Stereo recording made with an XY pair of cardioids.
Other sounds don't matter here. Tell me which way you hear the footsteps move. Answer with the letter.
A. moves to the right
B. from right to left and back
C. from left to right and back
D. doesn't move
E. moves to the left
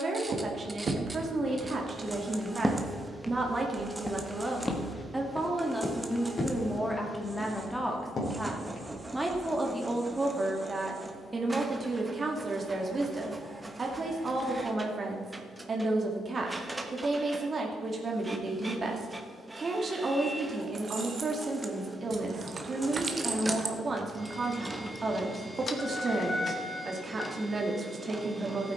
E.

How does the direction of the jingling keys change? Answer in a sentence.
In this clip you hear the jingling keys move to the left.